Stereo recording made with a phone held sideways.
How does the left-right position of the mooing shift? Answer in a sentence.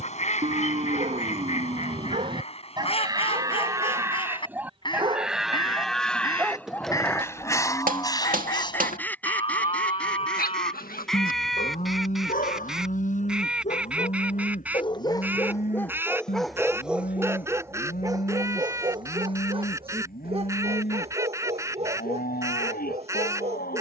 In this clip you hear the mooing travel towards the left.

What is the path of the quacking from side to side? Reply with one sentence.
In this clip you hear the quacking travel towards the right.